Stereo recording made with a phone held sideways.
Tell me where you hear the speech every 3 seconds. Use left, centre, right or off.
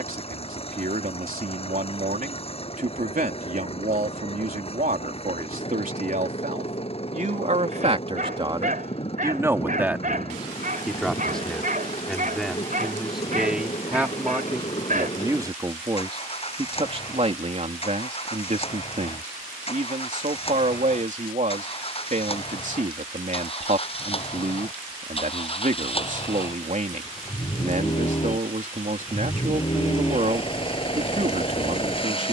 right, right, right, centre, centre, right, right, right, right, right, right.